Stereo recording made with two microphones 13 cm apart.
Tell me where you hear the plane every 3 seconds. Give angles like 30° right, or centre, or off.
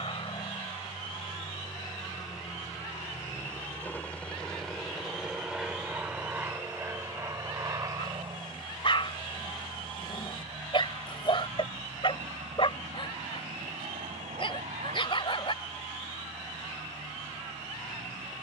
40° left, 10° left, 20° right, 40° right, 50° right, 60° right.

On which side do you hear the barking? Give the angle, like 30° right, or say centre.
40° left.